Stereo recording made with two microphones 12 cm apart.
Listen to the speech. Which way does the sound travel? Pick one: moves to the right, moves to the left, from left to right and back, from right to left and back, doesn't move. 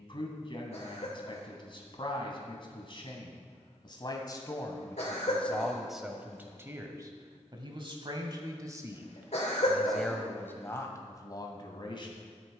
from left to right and back.